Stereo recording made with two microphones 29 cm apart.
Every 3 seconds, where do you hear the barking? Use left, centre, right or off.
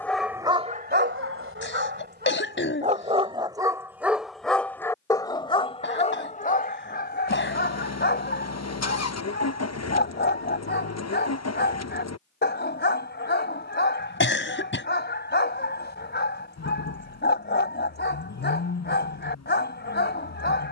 right, centre, left, left, left, left, left.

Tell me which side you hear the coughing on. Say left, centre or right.
left.